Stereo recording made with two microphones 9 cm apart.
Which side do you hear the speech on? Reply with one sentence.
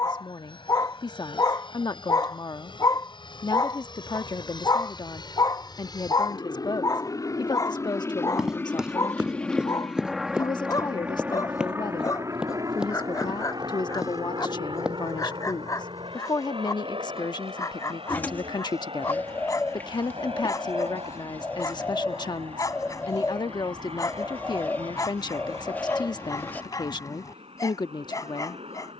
In this clip you hear the speech on the left.